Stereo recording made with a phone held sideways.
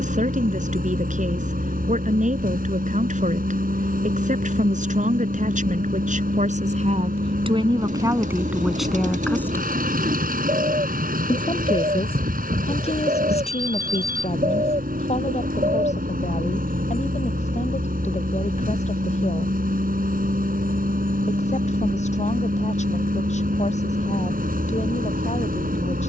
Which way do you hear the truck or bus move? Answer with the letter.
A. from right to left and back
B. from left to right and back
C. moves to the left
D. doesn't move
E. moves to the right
D.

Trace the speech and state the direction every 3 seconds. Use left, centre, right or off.
right, right, right, left, left, left, left, left, left.